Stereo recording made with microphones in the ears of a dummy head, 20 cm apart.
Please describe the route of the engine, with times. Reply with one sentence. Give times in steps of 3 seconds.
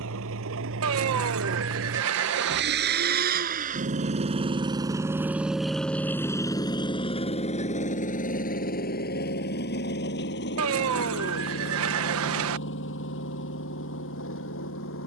You can hear the engine on the right from 0 s and on the left from 6 s.